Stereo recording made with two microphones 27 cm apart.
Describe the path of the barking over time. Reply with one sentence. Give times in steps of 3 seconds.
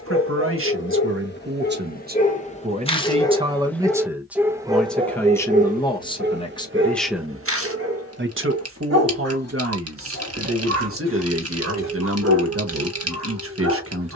In this clip you hear the barking on the left from 0 s, in the centre from 3 s and on the right from 6 s.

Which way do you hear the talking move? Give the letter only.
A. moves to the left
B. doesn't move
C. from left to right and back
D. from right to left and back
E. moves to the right
D.